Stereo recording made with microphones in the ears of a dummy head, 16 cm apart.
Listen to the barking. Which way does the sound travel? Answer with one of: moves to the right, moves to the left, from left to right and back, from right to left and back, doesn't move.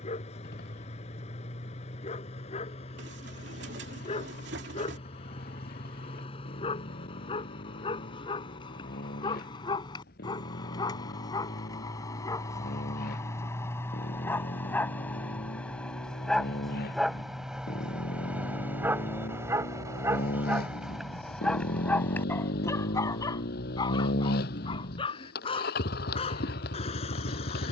from left to right and back.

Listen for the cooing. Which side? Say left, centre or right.
right.